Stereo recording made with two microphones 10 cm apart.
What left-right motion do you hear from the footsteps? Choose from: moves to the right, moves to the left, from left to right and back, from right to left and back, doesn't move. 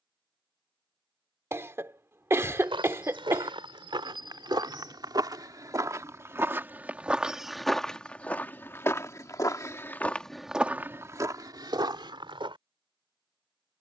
from right to left and back.